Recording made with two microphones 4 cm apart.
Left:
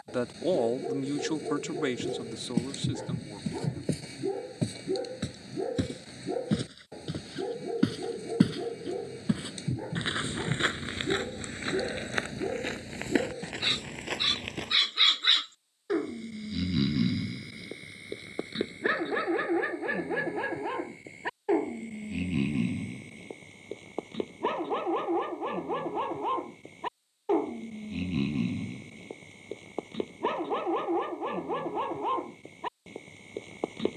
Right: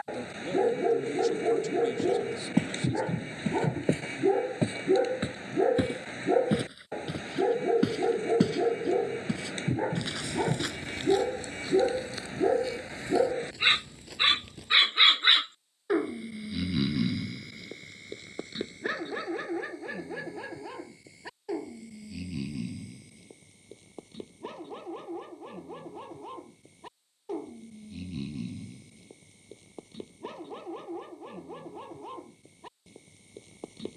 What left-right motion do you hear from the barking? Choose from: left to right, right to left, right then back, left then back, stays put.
right to left.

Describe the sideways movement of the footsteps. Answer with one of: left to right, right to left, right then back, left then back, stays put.
right to left.